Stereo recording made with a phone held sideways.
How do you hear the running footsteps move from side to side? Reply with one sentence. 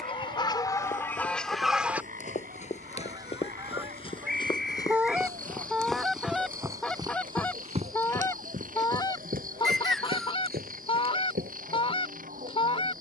You can hear the running footsteps move from left to right.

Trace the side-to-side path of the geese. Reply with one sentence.
In this clip you hear the geese move from left to right and back again.